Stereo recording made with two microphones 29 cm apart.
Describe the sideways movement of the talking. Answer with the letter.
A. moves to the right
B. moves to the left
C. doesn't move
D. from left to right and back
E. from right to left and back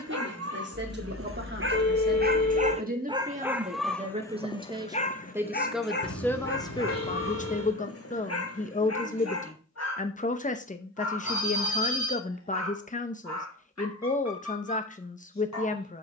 B.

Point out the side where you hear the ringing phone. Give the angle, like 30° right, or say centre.
70° left.